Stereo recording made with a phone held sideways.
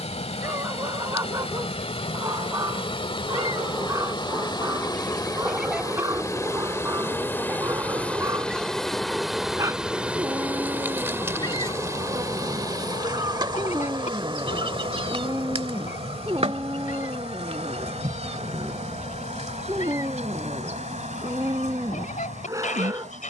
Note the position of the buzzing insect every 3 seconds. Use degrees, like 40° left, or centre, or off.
50° left, 30° left, 10° left, 10° right, 40° right, 50° right, 60° right, 70° right.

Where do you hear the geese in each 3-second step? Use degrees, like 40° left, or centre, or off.
70° left, 30° left, 20° right, 20° left, 50° left, 70° left, 70° left, 70° left.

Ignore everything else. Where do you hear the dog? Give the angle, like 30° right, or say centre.
30° right.